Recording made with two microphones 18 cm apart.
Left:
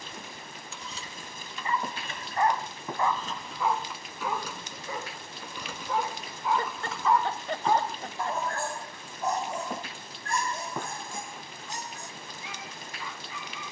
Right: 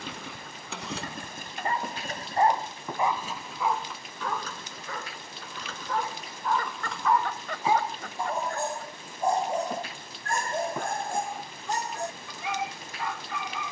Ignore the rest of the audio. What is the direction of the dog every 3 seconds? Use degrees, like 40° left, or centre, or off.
60° right, 10° left, centre, 50° right, 70° right.